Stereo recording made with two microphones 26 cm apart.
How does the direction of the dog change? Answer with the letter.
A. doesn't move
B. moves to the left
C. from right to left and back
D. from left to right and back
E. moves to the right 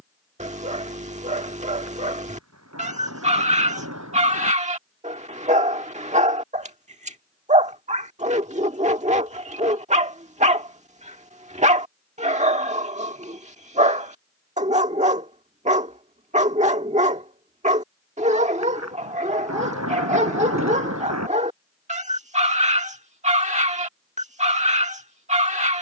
A.